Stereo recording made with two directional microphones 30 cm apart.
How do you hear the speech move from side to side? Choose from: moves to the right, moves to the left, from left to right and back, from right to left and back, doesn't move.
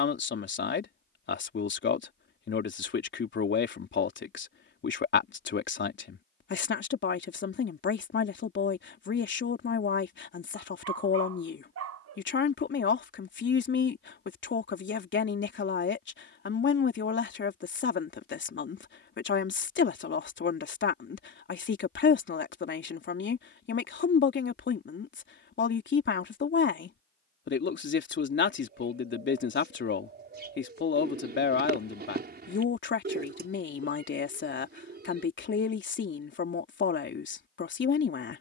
doesn't move.